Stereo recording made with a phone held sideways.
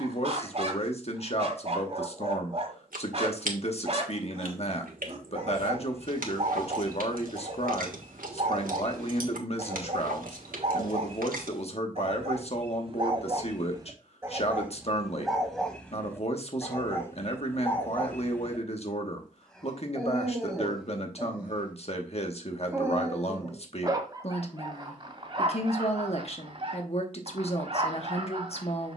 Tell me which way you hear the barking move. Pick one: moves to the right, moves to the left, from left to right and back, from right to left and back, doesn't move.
from right to left and back.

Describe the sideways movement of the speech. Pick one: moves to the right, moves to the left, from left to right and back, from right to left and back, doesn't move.
doesn't move.